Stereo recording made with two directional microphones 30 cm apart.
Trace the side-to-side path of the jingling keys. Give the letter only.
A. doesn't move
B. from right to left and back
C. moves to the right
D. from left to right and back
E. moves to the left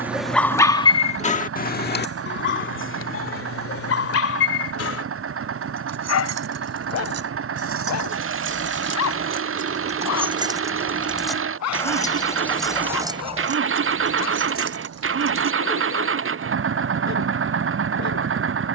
B.